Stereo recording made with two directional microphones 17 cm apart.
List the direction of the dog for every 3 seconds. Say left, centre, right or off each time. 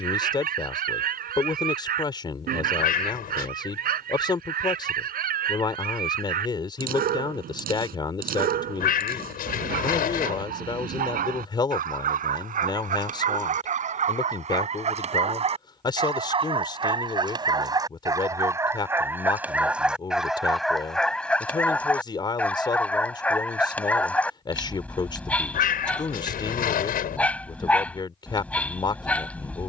right, right, right, right, right, right, centre, centre, centre, centre.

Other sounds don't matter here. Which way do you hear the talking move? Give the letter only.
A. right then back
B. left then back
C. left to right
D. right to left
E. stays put
E.